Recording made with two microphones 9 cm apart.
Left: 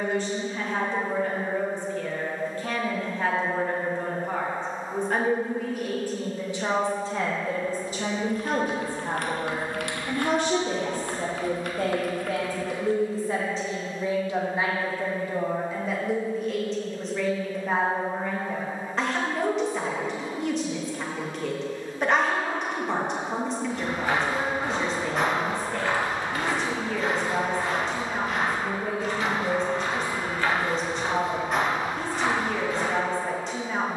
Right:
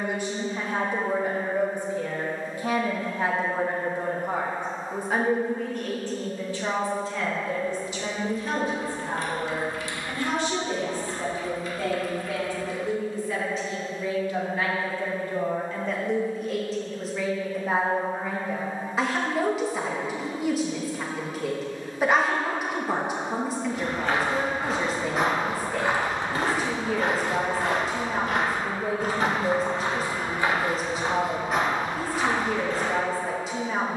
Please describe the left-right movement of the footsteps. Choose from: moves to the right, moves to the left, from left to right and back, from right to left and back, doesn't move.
from left to right and back.